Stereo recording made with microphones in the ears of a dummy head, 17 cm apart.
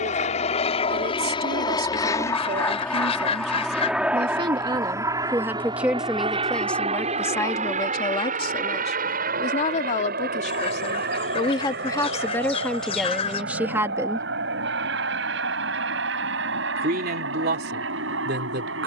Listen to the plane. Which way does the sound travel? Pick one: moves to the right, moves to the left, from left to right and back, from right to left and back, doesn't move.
moves to the right.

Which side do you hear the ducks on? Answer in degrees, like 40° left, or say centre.
30° left.